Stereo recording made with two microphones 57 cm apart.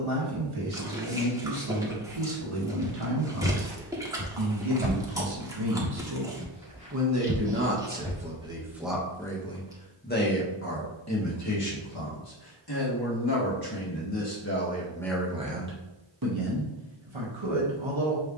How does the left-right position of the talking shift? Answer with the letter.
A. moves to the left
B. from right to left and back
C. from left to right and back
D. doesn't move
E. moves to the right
B.